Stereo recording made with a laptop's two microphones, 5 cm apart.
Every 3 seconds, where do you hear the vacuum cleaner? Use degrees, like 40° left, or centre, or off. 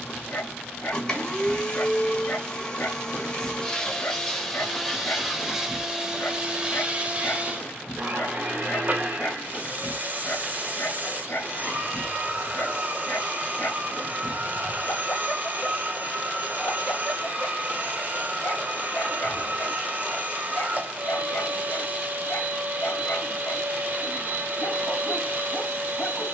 20° left, centre, 30° right, 40° right, 40° right, 40° right, 40° right, 40° right, 40° right.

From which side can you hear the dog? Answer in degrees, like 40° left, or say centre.
50° left.